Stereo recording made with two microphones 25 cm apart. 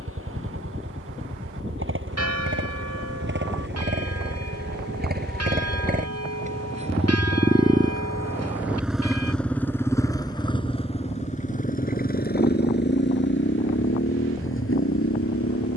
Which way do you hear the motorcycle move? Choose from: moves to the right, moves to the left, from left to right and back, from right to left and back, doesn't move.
moves to the left.